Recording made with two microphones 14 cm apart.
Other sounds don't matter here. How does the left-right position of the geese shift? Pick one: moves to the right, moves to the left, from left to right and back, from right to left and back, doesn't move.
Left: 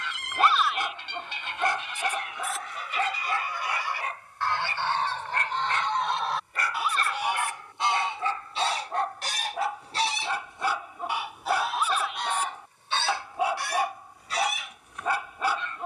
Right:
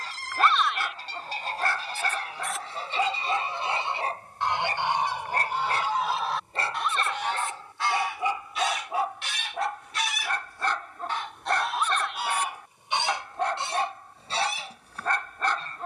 from right to left and back.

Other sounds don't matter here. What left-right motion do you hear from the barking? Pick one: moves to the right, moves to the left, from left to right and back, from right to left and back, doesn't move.
from left to right and back.